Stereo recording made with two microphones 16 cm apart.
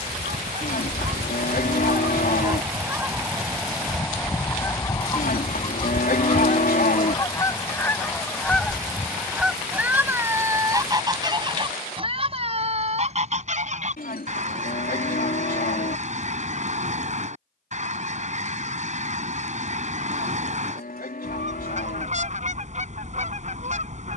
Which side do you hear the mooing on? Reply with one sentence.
You can hear the mooing on the left.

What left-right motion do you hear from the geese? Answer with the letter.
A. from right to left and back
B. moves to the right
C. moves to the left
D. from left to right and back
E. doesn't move
A.